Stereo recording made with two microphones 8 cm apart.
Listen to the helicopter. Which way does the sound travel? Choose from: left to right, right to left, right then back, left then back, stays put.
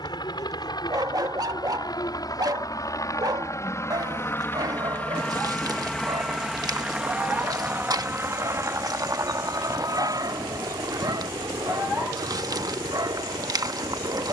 left to right.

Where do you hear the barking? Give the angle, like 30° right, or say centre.
50° right.